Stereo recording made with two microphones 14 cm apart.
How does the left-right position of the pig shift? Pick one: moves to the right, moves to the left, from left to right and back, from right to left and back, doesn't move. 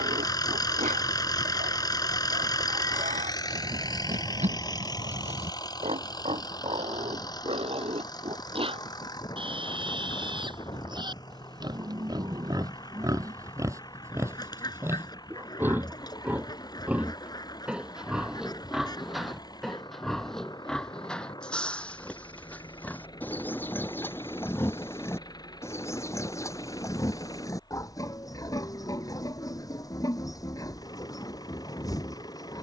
moves to the left.